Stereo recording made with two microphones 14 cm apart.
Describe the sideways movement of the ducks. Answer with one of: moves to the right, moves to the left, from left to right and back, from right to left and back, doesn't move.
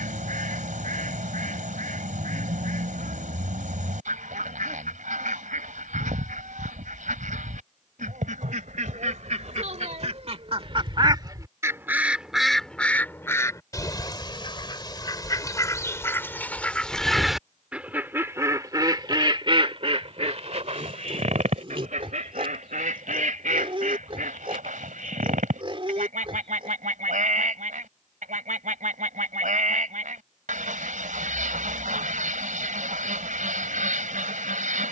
from right to left and back.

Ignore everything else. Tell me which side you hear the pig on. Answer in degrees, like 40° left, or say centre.
40° right.